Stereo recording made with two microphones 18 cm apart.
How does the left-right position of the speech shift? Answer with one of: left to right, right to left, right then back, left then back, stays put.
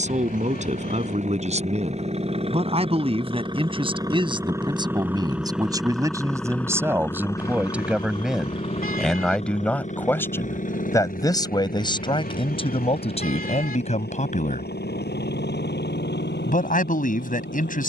right to left.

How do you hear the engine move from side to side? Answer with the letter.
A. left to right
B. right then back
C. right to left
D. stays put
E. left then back
C.